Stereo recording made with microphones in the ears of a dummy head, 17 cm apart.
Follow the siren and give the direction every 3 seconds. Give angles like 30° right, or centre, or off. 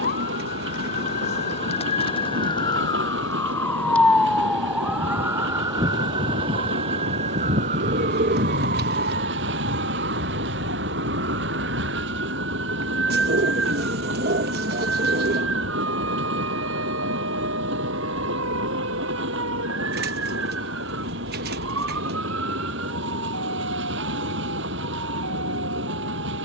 40° left, centre, 40° right, 60° right, 70° right, 70° right, 80° right, 80° right, 80° right.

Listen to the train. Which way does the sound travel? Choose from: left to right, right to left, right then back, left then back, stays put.
stays put.